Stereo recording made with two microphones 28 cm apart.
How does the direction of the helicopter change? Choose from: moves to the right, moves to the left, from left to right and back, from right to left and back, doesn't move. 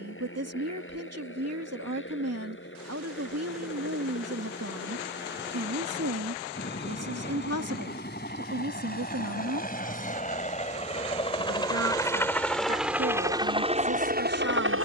moves to the right.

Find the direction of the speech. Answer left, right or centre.
right.